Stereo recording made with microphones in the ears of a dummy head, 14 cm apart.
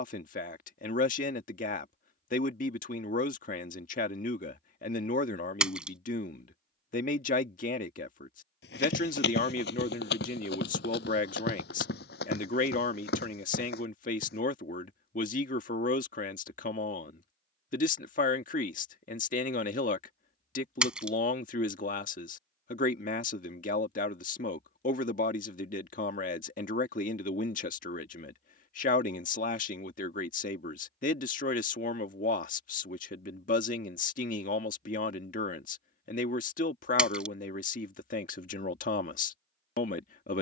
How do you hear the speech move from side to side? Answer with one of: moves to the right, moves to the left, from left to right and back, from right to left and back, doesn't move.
doesn't move.